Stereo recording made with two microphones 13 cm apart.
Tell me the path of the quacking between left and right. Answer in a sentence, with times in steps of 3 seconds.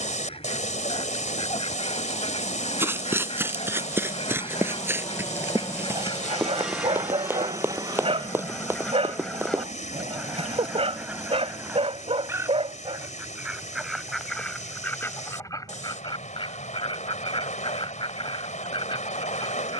In this clip you hear the quacking on the left from 0 s, in the centre from 9 s and on the left from 15 s.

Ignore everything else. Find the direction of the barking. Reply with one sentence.
In this clip you hear the barking on the right.